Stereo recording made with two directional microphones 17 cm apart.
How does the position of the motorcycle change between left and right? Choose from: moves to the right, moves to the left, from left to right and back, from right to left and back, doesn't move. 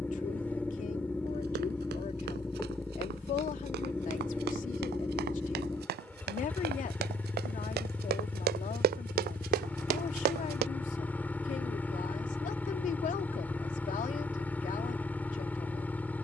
doesn't move.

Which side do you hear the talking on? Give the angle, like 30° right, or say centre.
50° left.